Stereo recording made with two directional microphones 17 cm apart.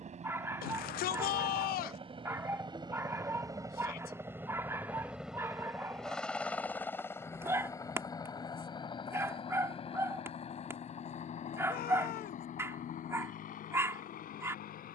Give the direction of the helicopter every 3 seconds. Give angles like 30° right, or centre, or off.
40° right, 10° right, 20° left, 40° left, 50° left.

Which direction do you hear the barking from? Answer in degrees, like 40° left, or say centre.
20° right.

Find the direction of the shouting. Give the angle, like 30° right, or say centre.
60° left.